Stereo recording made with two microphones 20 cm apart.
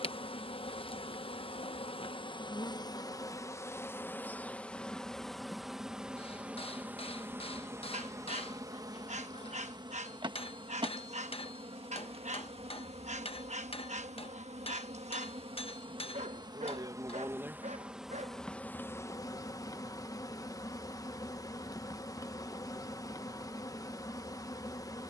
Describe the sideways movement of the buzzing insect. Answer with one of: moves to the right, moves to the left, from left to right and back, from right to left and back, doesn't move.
from left to right and back.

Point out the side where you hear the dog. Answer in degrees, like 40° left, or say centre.
40° right.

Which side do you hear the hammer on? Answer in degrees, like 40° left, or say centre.
30° left.